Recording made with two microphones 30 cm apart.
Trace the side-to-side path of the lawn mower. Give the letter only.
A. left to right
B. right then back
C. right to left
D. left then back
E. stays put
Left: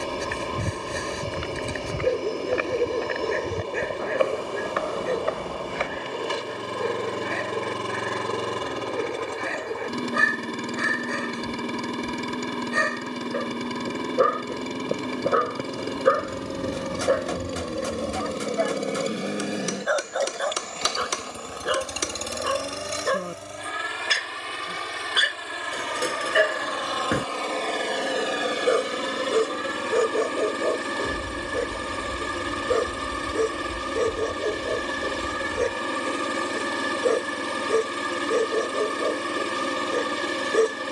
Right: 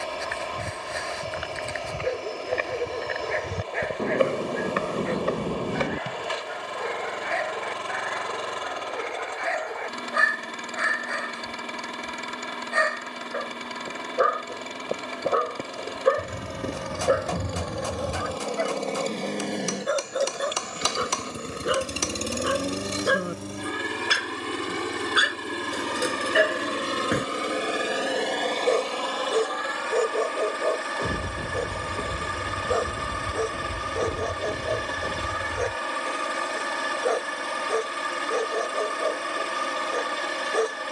B.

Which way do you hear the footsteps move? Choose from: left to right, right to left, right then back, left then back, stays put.
left to right.